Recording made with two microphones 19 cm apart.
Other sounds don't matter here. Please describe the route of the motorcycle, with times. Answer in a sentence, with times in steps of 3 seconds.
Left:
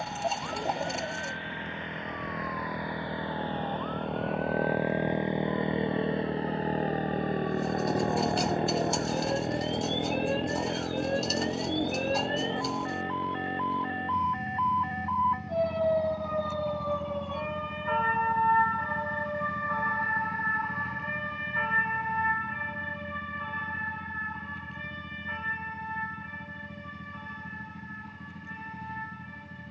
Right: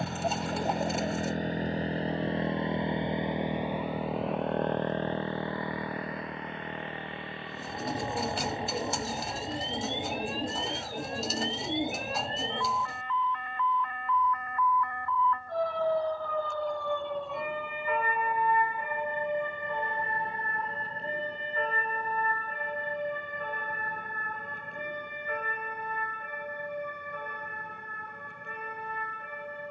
In this clip you hear the motorcycle on the right from 0 s, in the centre from 3 s and on the left from 6 s.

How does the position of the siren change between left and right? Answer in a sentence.
You can hear the siren move from left to right.